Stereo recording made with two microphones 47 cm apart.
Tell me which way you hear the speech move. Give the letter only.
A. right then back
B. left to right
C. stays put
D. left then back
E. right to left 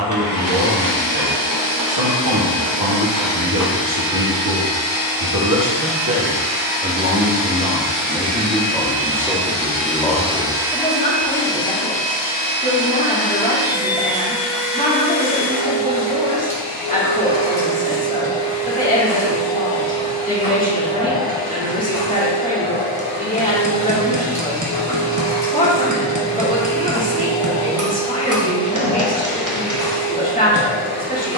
E.